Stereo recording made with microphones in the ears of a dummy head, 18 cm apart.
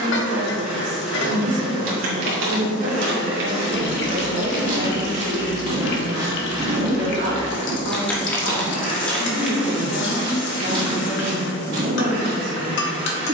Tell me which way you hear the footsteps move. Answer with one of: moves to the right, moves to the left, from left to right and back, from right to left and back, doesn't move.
from right to left and back.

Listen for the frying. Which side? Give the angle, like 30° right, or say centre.
60° left.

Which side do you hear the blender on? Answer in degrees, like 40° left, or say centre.
10° right.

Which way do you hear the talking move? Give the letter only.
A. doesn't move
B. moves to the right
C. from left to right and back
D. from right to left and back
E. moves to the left
A.